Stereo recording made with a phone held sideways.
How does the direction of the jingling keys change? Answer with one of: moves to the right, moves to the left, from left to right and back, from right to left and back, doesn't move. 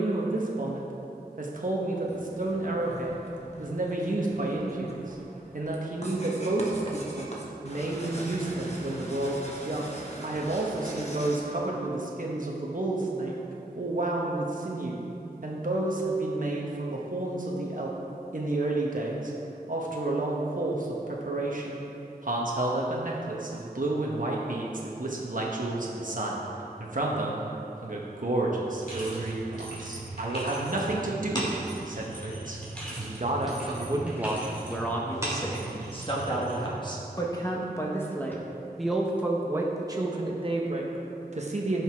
moves to the right.